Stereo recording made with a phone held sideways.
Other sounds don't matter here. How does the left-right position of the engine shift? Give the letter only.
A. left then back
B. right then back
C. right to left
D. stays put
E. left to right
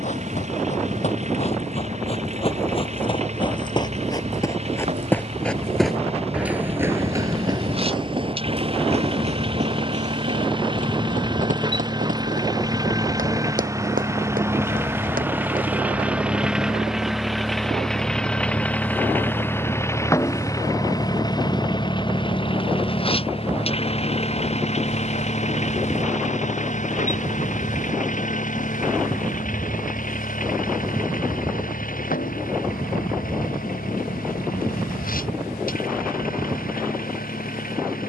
C.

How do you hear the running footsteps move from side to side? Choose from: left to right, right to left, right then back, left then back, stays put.
left to right.